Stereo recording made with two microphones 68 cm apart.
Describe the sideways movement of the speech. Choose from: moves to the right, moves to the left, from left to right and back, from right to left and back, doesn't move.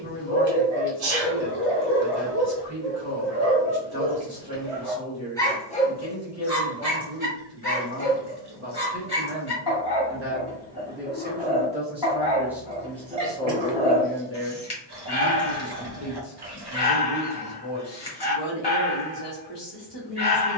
moves to the left.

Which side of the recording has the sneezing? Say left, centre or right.
right.